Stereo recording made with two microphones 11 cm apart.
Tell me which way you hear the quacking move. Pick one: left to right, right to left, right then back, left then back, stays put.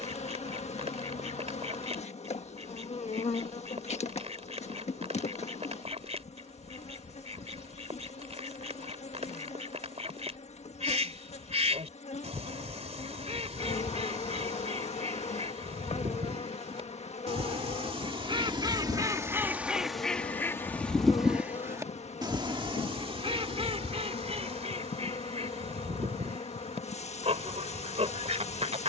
left then back.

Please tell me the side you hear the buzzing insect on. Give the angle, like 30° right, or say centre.
80° left.